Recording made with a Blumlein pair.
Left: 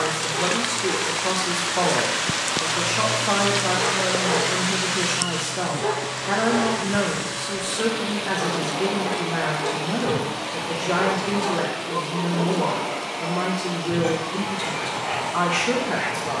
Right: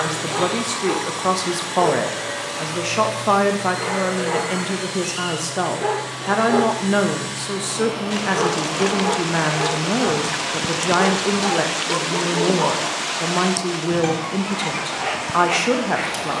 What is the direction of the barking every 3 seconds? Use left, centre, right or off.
right, centre, right, right, right, right.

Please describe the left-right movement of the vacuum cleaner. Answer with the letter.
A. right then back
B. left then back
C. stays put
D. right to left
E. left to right
D.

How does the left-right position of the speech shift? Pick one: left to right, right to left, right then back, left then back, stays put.
stays put.